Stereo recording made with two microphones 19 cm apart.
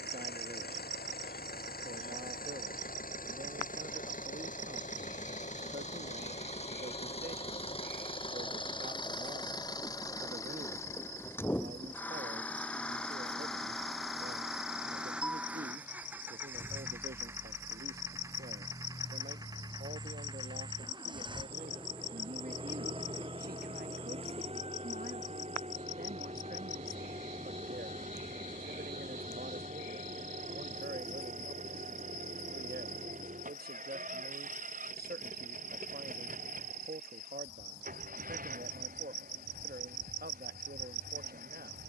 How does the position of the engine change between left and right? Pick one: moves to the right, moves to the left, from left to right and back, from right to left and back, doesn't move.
moves to the right.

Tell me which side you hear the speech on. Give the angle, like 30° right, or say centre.
60° right.